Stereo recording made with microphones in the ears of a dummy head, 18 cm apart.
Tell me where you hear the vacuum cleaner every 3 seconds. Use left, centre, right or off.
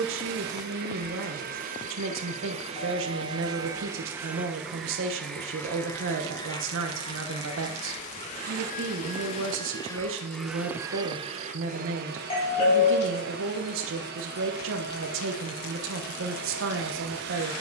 right, centre, left, centre, right, right.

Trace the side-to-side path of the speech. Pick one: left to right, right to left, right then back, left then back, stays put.
stays put.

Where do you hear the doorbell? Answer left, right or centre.
left.